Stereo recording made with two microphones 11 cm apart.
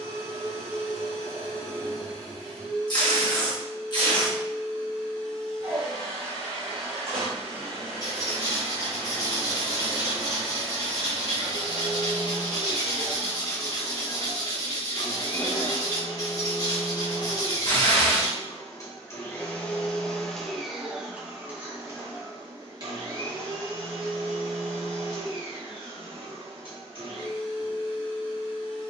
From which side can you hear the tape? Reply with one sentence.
In this clip you hear the tape on the left.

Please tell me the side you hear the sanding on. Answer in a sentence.
In this clip you hear the sanding on the left.